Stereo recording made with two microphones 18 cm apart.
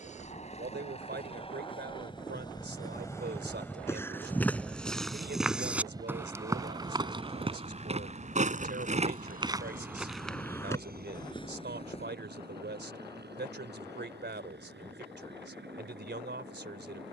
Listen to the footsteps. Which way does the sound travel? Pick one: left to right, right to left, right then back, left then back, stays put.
right then back.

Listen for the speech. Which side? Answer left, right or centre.
right.